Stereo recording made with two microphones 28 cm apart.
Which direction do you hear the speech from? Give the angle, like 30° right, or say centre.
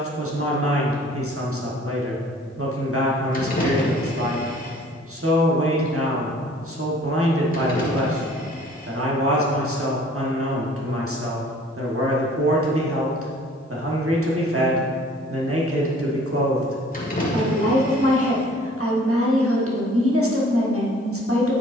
50° right.